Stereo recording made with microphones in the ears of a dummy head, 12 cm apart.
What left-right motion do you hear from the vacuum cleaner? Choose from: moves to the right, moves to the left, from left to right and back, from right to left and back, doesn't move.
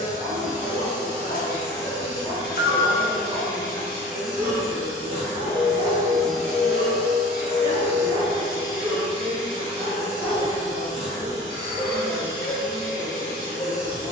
moves to the right.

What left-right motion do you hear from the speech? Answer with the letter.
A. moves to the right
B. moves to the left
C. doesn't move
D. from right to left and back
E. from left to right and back
E.